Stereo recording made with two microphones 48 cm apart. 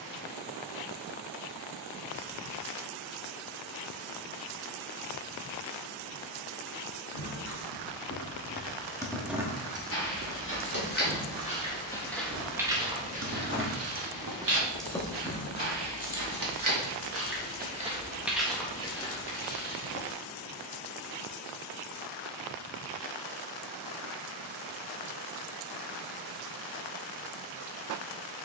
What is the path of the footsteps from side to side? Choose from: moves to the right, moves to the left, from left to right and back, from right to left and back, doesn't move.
from left to right and back.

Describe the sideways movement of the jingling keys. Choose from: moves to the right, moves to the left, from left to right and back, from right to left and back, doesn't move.
from left to right and back.